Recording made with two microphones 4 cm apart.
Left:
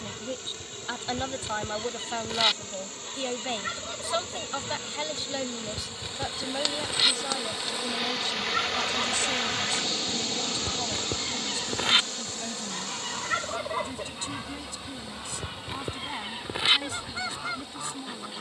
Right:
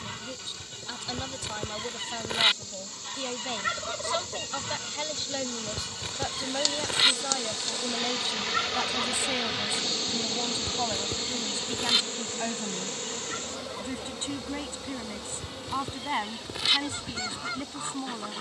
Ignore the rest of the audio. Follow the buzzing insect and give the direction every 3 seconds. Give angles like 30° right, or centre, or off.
50° left, 30° left, 10° left, 20° right, 50° right, 70° right.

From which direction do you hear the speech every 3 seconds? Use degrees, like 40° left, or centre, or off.
30° left, 10° left, 10° right, 20° right, 30° right, 40° right.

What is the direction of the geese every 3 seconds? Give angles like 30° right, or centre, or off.
20° right, 20° right, 10° right, 20° left, 50° left, 30° left.